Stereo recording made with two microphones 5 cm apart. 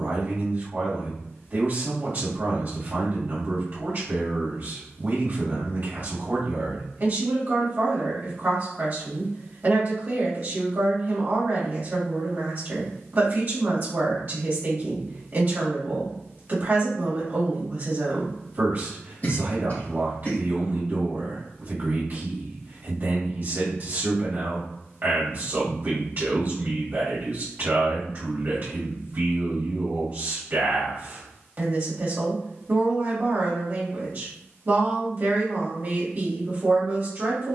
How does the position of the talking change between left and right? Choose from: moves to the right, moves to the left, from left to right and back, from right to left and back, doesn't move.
doesn't move.